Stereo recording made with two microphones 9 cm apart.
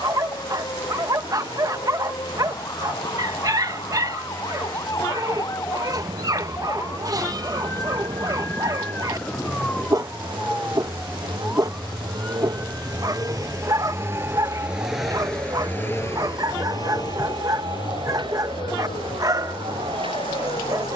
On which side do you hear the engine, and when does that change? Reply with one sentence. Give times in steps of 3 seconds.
In this clip you hear the engine on the right from 0 s and on the left from 15 s.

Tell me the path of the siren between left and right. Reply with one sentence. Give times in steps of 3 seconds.
You can hear the siren on the left from 0 s, in the centre from 9 s and on the right from 12 s.